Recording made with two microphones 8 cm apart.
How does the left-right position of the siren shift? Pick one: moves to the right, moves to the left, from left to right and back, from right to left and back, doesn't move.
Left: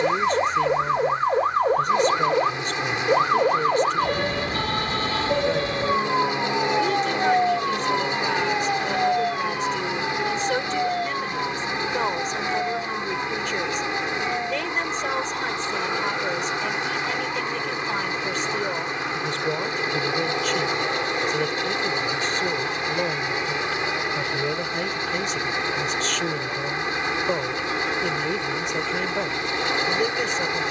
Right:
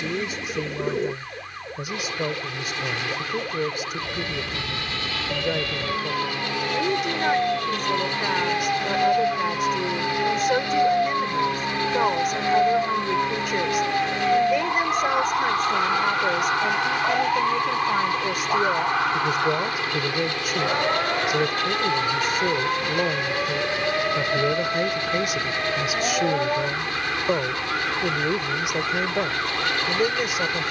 moves to the right.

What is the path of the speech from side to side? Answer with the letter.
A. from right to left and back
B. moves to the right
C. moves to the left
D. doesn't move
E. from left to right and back
D.